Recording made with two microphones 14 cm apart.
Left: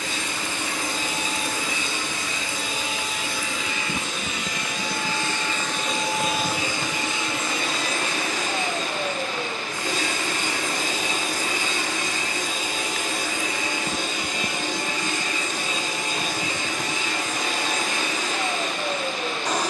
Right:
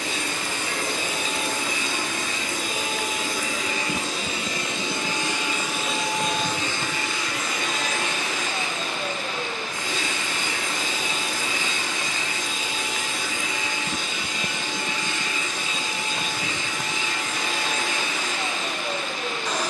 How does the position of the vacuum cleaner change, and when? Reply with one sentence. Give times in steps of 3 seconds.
You can hear the vacuum cleaner on the right from 0 s and on the left from 6 s.